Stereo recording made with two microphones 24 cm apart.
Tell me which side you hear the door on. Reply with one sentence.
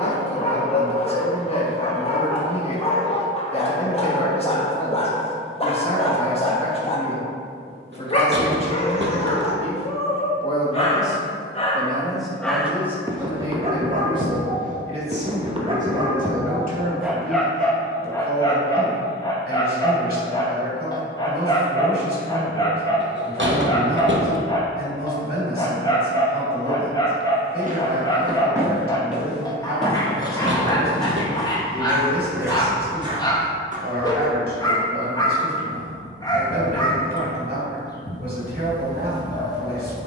You can hear the door on the right.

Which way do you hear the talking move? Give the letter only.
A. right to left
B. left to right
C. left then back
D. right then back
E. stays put
B.